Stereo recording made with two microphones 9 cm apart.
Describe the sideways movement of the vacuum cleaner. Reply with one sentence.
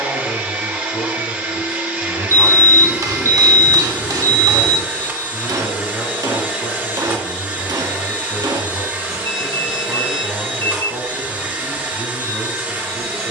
In this clip you hear the vacuum cleaner stay put.